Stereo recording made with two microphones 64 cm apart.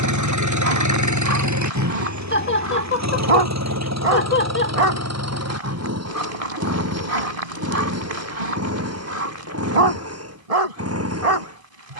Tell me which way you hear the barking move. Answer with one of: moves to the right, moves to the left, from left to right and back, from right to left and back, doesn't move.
doesn't move.